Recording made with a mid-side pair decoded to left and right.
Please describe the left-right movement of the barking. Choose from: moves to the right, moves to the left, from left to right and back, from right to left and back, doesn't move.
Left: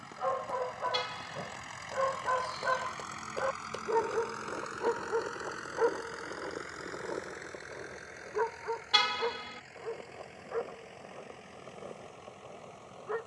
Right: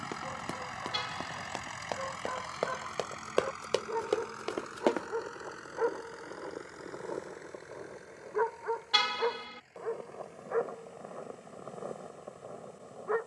moves to the right.